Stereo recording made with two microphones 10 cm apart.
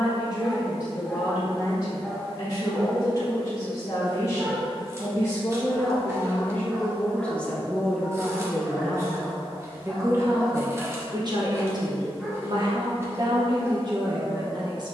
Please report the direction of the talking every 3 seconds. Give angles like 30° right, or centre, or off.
40° left, 30° left, 10° left, 30° right, 50° right.